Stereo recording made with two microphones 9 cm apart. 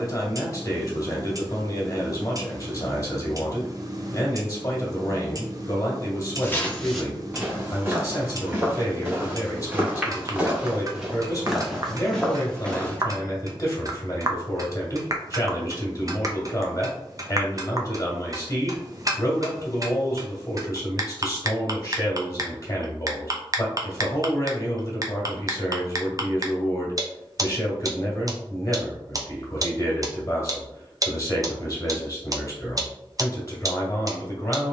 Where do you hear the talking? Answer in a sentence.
You can hear the talking on the left.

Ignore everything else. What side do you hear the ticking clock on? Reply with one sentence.
In this clip you hear the ticking clock on the right.